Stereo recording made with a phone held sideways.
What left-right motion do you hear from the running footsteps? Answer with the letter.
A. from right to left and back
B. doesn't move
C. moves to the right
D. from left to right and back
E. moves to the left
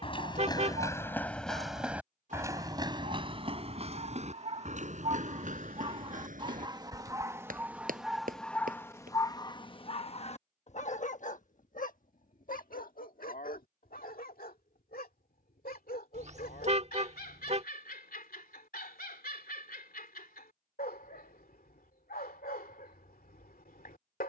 C.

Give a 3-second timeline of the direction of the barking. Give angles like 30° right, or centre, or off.
60° right, 50° right, 10° right, 40° left, 70° left, 80° left, 80° left, 80° left.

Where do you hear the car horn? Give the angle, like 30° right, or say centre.
50° right.